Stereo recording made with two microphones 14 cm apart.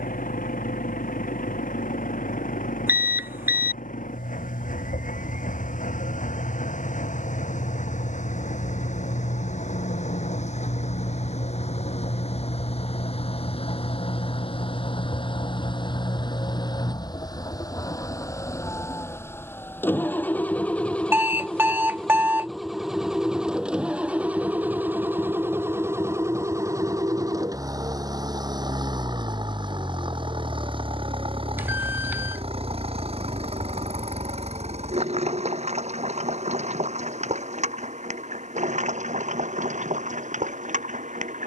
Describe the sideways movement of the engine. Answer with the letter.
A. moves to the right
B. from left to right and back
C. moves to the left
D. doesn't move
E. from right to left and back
A.